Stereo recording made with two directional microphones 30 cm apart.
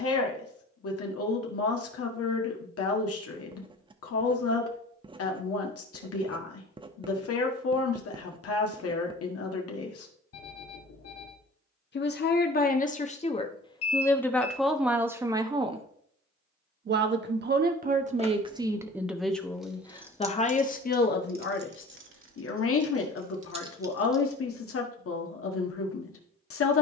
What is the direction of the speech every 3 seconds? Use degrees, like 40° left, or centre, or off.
50° left, 50° left, 50° left, 50° left, 20° left, 20° right, centre, 40° left, 50° left.